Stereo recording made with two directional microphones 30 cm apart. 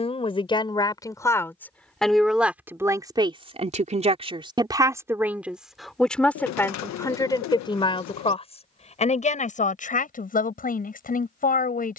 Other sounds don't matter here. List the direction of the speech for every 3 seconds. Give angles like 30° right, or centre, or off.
10° left, 10° right, 10° left, 30° left.